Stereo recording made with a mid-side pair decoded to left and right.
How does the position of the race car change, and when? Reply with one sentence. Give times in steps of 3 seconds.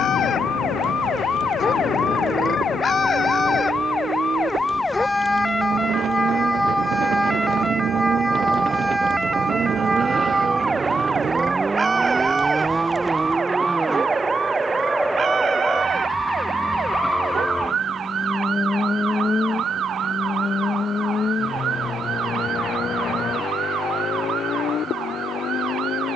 In this clip you hear the race car on the right from 0 s, in the centre from 12 s and on the left from 18 s.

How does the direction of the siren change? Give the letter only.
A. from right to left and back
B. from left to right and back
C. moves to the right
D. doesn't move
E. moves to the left
C.